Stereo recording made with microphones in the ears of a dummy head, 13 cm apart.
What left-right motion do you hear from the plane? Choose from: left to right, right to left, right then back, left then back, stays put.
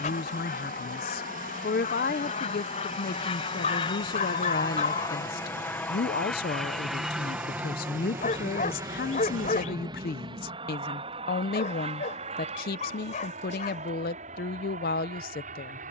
left to right.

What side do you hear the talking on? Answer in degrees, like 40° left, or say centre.
70° left.